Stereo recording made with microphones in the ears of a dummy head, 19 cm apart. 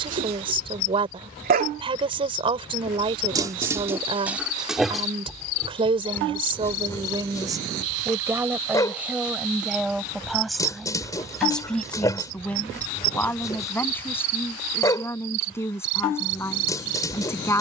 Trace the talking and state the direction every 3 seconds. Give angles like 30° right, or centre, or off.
20° right, 20° right, 20° right, centre, 10° left, 10° left.